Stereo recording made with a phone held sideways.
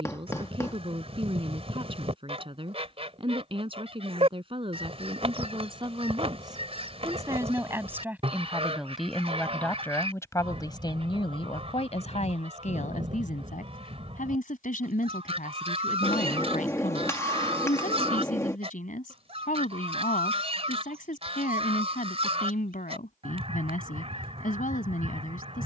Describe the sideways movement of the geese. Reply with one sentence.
You can hear the geese stay in one place.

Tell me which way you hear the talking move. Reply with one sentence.
You can hear the talking move to the left.